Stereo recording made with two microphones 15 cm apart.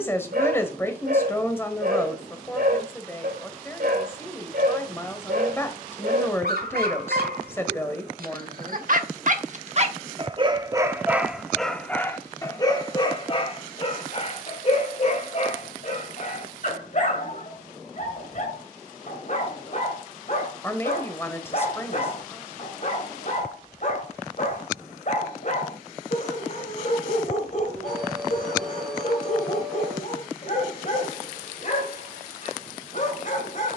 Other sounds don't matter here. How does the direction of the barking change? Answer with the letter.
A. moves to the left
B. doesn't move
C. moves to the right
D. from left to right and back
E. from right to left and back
A.